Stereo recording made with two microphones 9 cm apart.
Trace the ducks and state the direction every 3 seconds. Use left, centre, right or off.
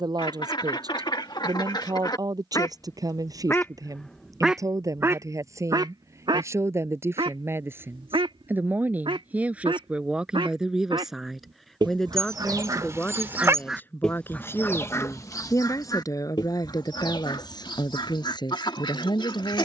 left, centre, right, right, centre, left, left.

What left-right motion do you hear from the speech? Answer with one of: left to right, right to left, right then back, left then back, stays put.
right to left.